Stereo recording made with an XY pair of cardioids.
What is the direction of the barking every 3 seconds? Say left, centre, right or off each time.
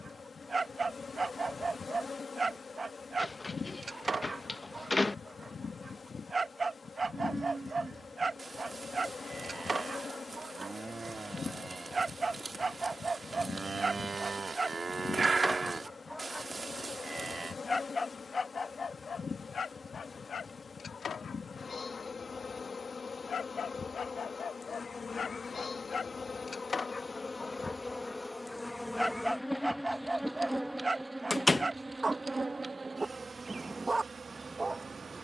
right, right, right, right, right, centre, left, left, left, centre, right, right.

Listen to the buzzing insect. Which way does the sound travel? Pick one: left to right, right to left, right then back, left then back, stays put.
left to right.